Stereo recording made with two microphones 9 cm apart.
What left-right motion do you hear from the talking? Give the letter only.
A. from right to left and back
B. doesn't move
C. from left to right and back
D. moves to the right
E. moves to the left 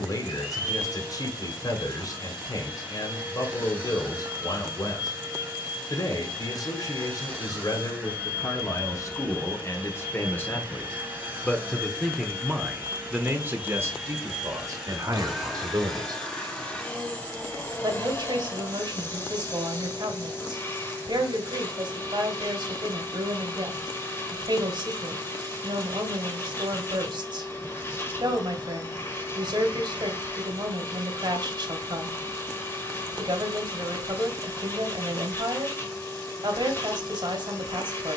D.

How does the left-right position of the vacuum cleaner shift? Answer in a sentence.
In this clip you hear the vacuum cleaner travel towards the left.